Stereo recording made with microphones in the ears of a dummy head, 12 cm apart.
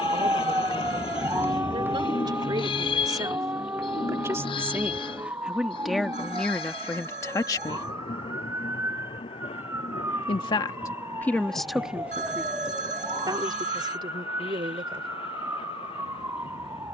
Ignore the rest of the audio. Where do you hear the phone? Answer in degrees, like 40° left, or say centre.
60° right.